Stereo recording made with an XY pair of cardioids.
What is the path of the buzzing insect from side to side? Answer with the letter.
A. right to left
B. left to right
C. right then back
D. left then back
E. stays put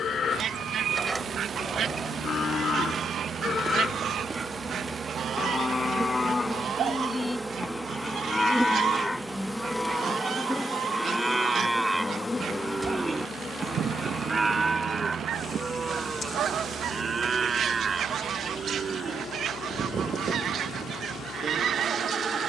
A.